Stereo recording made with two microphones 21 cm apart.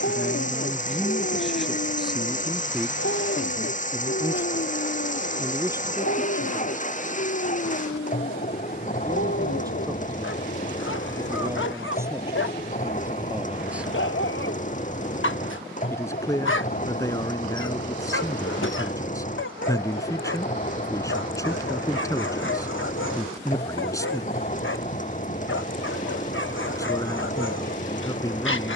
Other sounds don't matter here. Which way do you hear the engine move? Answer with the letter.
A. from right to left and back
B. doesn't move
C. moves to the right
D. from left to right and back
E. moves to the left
B.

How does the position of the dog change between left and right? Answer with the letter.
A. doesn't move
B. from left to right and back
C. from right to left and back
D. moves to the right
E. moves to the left
A.